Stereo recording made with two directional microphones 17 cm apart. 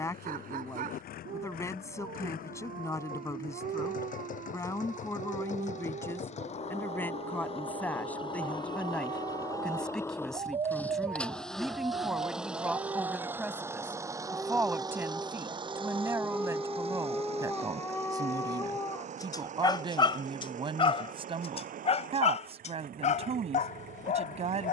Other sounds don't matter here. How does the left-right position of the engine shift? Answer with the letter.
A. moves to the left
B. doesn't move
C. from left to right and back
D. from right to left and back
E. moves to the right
E.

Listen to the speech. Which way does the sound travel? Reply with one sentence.
In this clip you hear the speech move from left to right.